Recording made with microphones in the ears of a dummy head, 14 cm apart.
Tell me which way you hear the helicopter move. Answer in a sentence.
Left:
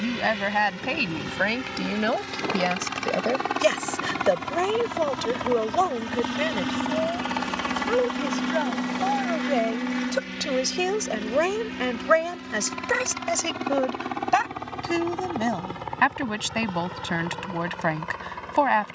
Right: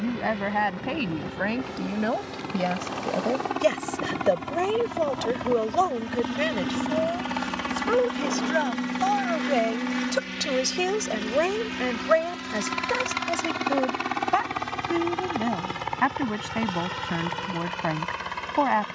In this clip you hear the helicopter travel towards the right.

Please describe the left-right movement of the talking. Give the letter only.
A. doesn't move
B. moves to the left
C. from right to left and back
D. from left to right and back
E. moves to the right
D.